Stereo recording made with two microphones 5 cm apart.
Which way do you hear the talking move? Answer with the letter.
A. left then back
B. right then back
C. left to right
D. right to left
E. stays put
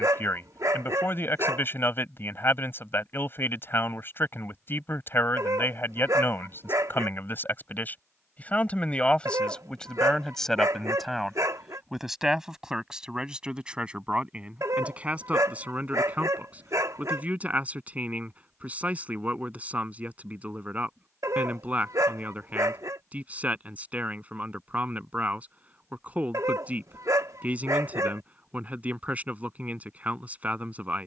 C.